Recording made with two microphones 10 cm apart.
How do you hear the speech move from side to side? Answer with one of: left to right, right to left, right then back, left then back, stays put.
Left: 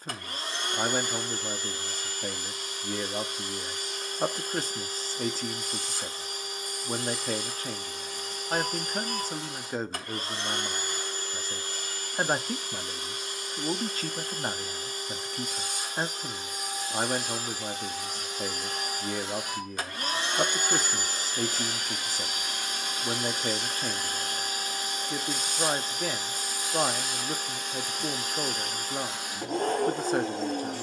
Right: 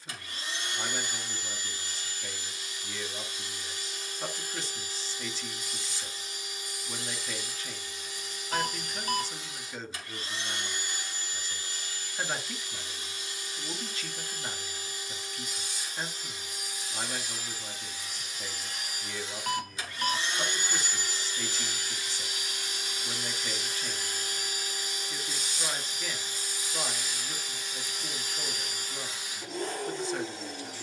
stays put.